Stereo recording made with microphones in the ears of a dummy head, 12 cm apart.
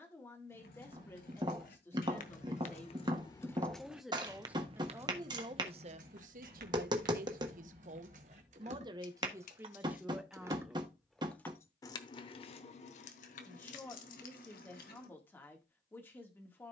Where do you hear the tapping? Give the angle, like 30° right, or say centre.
30° right.